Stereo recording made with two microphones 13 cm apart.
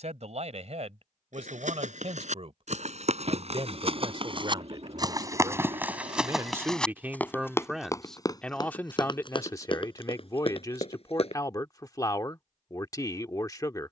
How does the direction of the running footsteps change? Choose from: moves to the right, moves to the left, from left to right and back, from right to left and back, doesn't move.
moves to the left.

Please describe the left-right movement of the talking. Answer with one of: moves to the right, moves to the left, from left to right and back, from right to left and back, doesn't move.
moves to the left.